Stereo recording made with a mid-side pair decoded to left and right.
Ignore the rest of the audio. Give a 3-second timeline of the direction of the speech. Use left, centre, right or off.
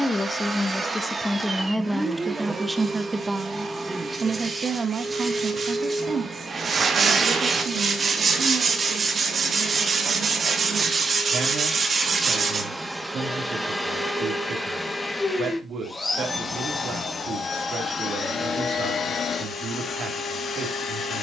centre, right, right, right, right, right, right.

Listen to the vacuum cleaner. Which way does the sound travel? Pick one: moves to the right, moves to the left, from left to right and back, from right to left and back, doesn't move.
moves to the left.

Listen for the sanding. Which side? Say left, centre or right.
right.